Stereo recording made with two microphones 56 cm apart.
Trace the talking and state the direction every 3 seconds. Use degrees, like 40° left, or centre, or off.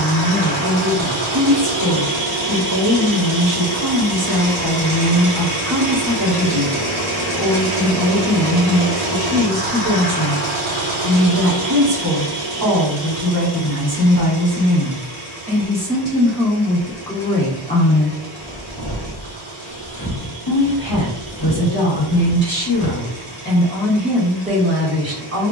30° right, 30° right, 30° right, 30° right, 30° right, centre, 40° left, 30° left, 20° right.